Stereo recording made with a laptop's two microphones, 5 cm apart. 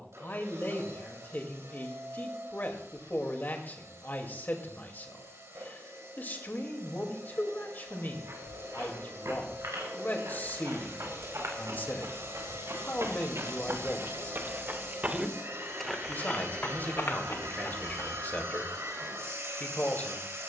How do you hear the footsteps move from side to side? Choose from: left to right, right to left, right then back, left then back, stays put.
right to left.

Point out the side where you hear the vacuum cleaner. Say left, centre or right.
right.